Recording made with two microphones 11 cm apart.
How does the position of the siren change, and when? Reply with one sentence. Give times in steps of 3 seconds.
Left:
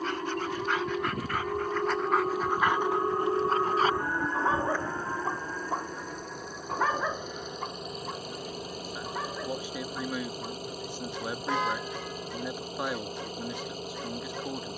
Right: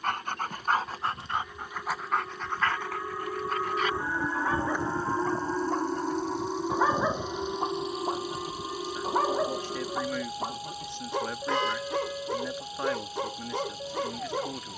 You can hear the siren on the left from 0 s, in the centre from 3 s and on the right from 6 s.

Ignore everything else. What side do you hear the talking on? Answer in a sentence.
In this clip you hear the talking in the centre.